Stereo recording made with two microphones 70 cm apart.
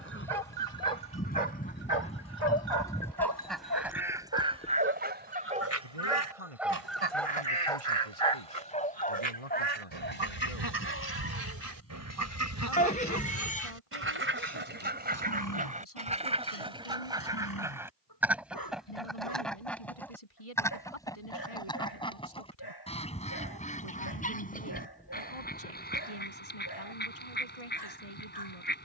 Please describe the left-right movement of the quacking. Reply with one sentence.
In this clip you hear the quacking move from left to right and back again.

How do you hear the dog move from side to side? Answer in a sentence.
You can hear the dog travel towards the left.